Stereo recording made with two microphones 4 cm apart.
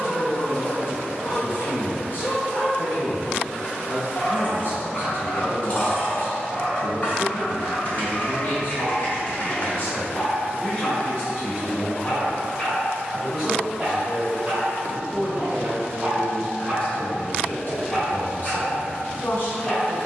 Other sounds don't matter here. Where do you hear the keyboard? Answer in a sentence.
You can hear the keyboard on the left.